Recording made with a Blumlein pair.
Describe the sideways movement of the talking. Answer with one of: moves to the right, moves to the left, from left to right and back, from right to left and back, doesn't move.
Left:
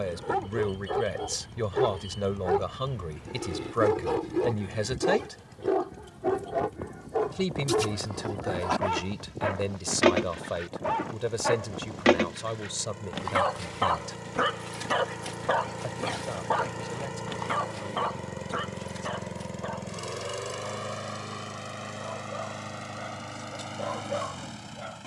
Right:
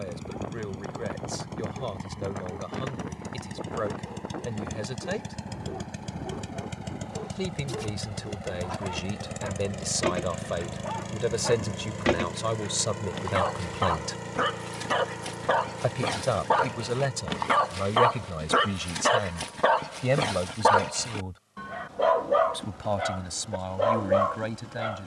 moves to the right.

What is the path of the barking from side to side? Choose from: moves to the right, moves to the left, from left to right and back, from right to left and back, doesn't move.
moves to the right.